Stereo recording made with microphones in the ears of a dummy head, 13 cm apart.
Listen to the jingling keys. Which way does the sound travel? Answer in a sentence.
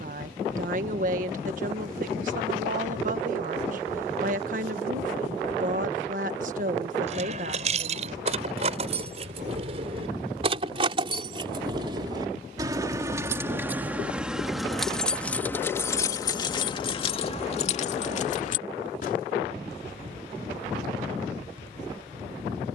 You can hear the jingling keys go from the right side to the left.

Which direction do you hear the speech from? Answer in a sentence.
In this clip you hear the speech on the right.